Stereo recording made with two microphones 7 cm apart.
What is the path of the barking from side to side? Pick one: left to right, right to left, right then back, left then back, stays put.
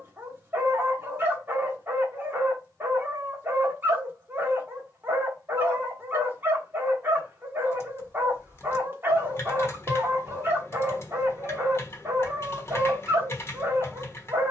stays put.